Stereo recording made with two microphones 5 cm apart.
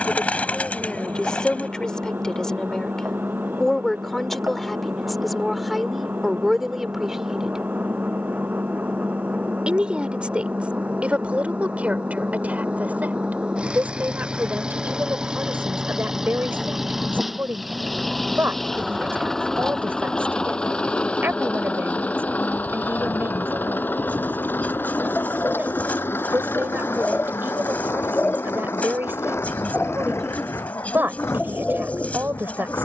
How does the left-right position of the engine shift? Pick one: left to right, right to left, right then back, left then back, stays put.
right to left.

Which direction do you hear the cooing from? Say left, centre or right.
left.